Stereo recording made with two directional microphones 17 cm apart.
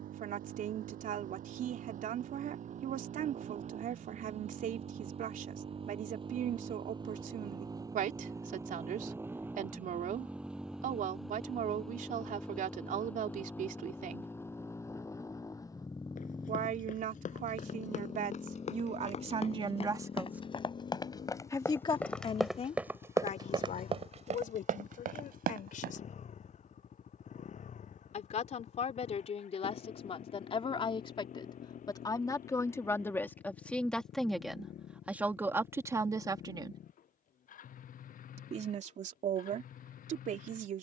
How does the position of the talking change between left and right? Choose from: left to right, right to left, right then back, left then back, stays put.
left then back.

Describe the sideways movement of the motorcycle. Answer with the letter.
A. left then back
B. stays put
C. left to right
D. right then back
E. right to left
E.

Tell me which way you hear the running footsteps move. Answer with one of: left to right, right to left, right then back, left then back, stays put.
left to right.